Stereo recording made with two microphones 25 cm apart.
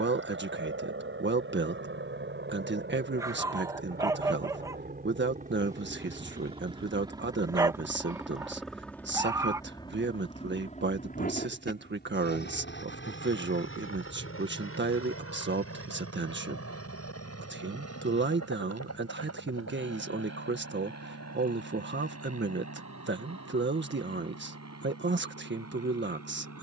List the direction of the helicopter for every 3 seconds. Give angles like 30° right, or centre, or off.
50° right, 40° right, 10° right, 20° left, 50° left, 60° left, 70° left, 80° left, 80° left.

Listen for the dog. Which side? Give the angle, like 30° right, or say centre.
10° right.